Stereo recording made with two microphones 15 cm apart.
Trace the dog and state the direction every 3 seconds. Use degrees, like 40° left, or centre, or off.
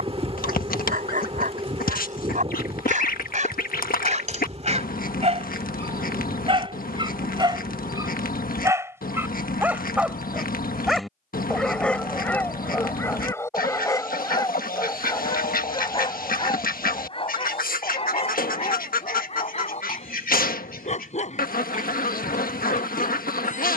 60° right, 50° right, 30° right, centre, 20° left, 40° left, 50° left, 50° left.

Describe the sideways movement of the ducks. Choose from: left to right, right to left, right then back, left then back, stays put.
stays put.